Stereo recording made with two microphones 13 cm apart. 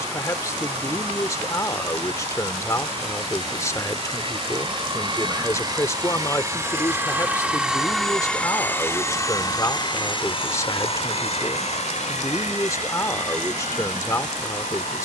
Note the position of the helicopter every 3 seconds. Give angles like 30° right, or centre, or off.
60° right, 40° right, 10° right, 40° left, 70° left.